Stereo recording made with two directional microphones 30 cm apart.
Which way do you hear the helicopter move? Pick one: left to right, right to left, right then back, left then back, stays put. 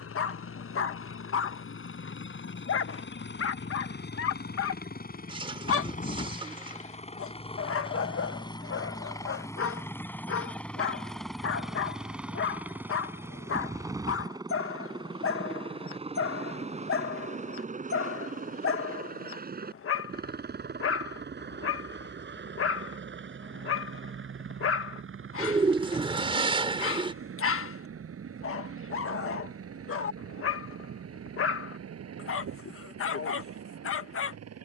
left to right.